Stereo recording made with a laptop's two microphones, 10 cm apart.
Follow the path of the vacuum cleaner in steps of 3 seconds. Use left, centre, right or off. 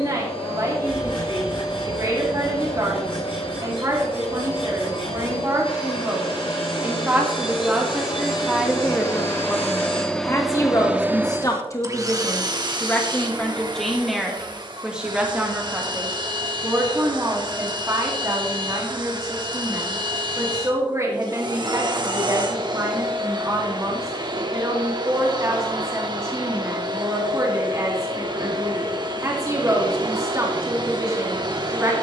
left, left, left, centre, right, right, right, right, right, right, right.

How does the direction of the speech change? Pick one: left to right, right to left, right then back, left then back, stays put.
left then back.